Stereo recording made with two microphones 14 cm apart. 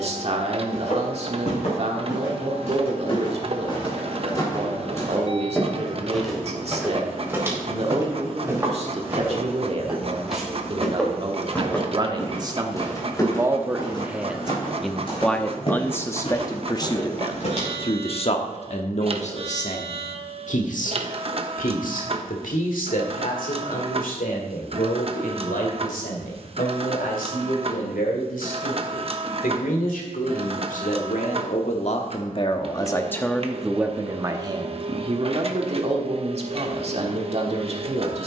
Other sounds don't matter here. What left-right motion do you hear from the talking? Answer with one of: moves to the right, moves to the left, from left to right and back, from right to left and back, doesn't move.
from right to left and back.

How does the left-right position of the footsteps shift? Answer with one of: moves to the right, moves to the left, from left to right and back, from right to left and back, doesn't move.
from left to right and back.